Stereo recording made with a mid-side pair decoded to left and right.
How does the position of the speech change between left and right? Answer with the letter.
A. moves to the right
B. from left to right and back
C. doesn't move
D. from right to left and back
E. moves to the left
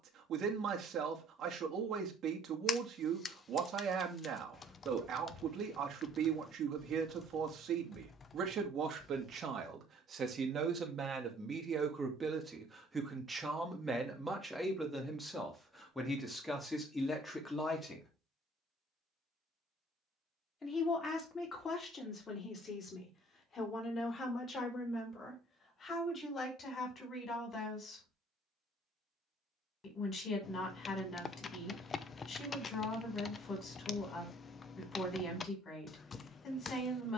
E.